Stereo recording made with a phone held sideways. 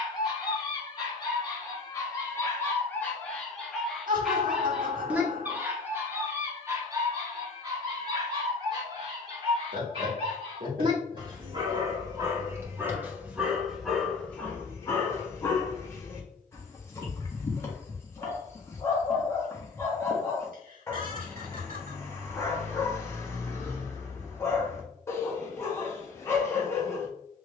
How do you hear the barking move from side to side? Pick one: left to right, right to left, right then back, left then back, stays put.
right then back.